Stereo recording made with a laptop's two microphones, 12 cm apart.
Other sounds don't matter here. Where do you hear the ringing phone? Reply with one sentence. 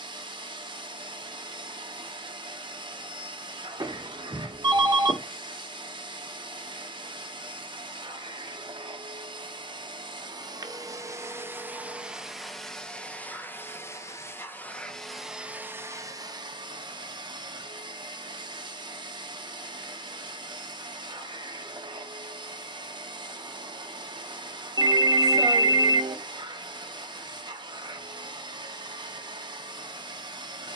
You can hear the ringing phone on the right.